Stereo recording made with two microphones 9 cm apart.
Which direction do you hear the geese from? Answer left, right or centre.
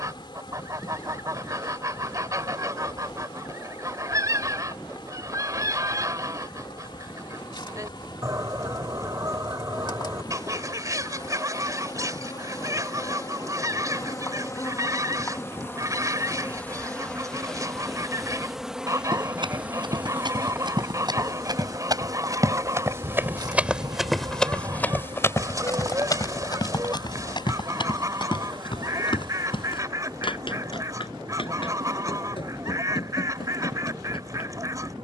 right.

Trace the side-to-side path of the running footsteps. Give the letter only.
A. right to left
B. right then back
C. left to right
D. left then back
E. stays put
A.